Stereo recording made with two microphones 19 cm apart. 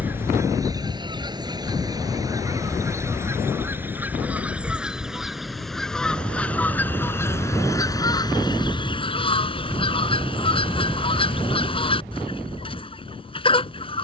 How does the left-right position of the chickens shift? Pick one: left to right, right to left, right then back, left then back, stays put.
right to left.